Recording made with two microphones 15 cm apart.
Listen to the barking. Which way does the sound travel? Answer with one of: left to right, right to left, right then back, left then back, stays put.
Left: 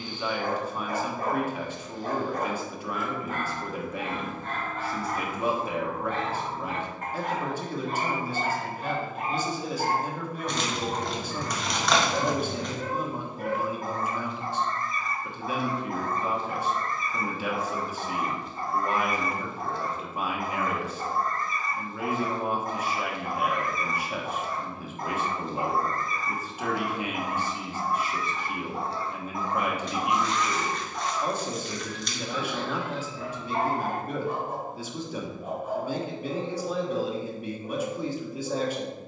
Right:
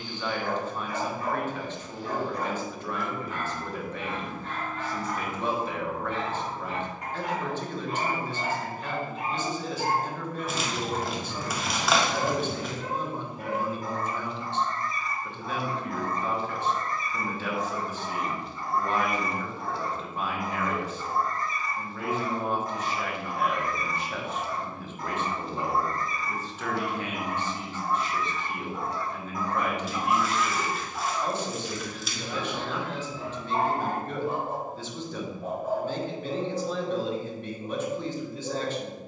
left to right.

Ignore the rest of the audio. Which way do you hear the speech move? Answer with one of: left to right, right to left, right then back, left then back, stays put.
stays put.